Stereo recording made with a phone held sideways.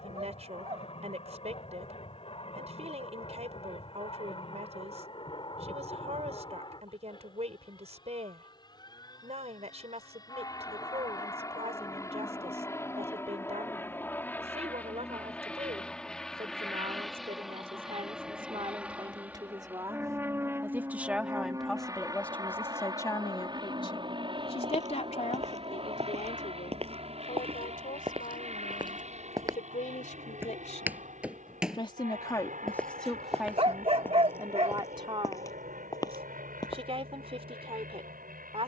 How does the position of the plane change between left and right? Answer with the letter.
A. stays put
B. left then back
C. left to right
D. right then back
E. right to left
C.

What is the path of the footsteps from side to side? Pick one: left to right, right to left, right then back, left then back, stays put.
right to left.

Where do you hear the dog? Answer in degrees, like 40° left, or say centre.
50° right.